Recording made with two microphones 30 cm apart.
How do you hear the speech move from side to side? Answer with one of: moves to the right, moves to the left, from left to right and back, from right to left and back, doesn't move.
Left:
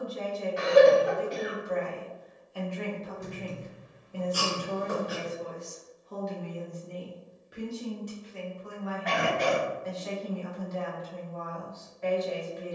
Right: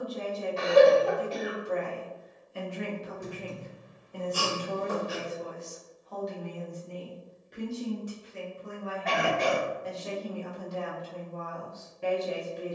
from right to left and back.